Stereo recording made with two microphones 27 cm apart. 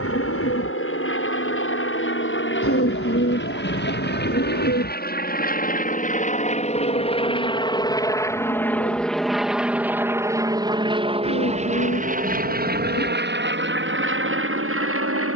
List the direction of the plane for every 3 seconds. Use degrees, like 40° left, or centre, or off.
50° left, 40° left, 20° left, 10° right, 40° right.